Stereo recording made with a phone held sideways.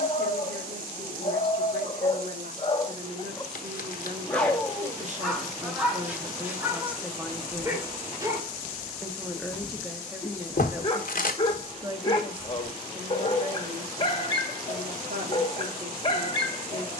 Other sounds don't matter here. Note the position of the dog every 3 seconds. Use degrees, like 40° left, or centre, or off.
40° left, centre, 20° right, 20° left, 30° left, 30° left.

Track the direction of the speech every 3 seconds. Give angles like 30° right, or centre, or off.
70° right, 50° right, 10° right, 10° right, 50° right, 60° right.